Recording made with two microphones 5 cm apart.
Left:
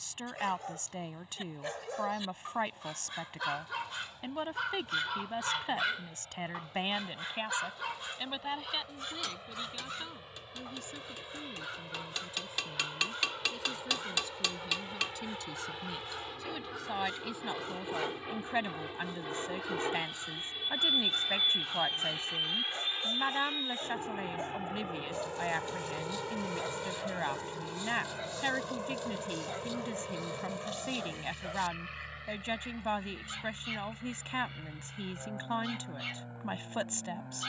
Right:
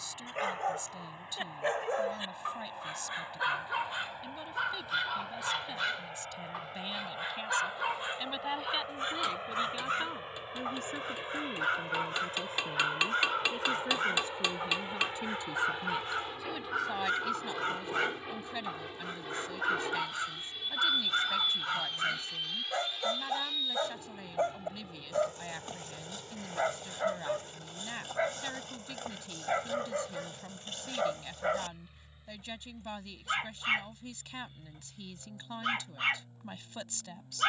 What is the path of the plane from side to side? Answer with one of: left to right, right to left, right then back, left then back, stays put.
right to left.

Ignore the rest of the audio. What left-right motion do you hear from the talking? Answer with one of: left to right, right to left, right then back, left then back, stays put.
right then back.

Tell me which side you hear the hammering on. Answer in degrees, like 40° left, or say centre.
20° right.